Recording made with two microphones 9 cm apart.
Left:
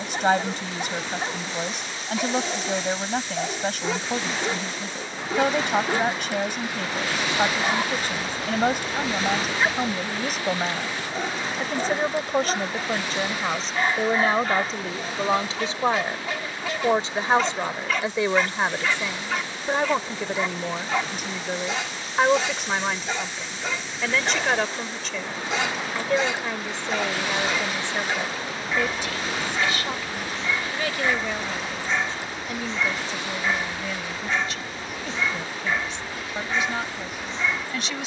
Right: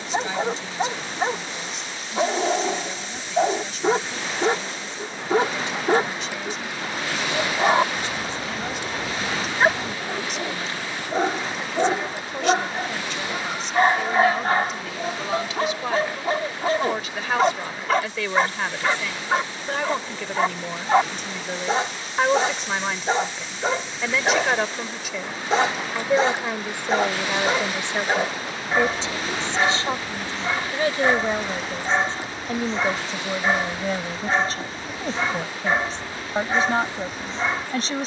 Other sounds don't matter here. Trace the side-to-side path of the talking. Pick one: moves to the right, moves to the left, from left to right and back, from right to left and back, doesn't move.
moves to the right.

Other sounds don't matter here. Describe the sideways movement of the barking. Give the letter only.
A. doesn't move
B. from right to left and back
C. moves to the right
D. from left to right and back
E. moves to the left
A.